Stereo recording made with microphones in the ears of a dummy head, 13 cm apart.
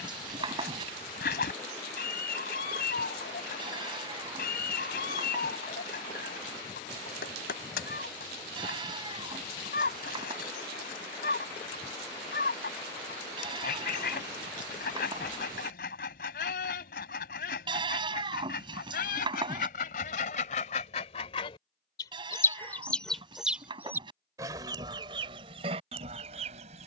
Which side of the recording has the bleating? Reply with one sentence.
In this clip you hear the bleating on the right.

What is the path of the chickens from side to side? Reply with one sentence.
You can hear the chickens move to the right.